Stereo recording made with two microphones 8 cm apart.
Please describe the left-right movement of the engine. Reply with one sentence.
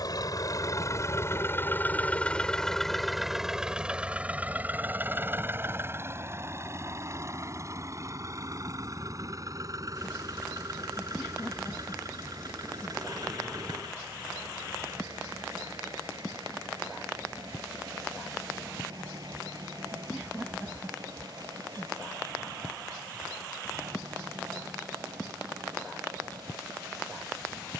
In this clip you hear the engine move from left to right.